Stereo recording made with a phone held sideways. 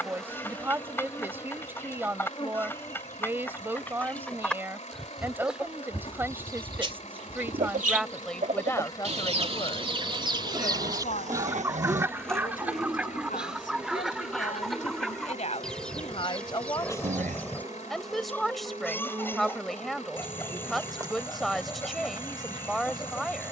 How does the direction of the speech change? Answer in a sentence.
In this clip you hear the speech move from right to left and back again.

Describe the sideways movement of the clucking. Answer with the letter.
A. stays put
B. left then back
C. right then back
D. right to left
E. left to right
C.